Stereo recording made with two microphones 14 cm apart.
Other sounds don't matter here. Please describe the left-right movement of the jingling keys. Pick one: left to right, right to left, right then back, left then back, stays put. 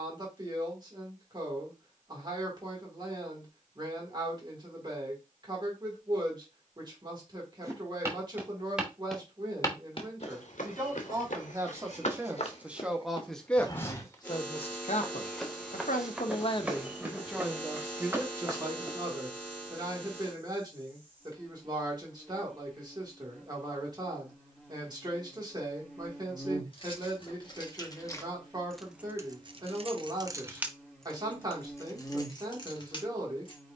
right then back.